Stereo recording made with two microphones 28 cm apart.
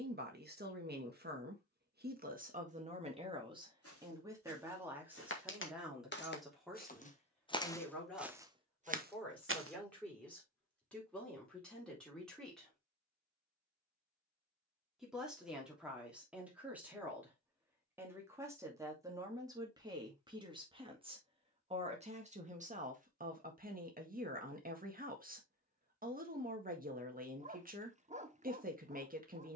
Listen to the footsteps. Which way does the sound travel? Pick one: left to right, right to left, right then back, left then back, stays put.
left to right.